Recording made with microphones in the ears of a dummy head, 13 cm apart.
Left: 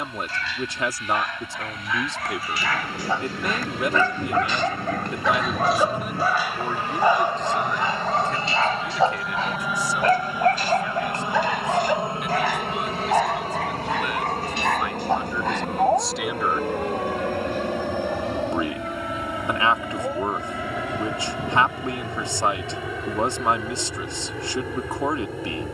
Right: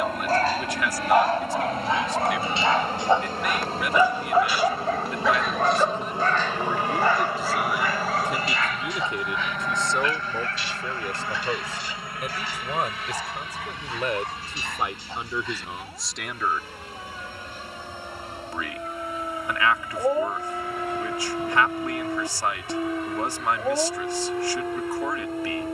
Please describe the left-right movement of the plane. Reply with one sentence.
You can hear the plane travel towards the left.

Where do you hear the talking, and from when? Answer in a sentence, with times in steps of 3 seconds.
In this clip you hear the talking on the left from 0 s, in the centre from 6 s, on the right from 9 s, in the centre from 15 s and on the left from 18 s.